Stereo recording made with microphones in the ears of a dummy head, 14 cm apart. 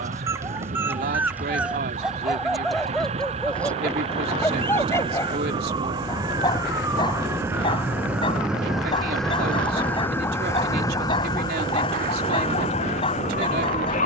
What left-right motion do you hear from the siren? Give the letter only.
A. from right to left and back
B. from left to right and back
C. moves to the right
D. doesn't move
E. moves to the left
E.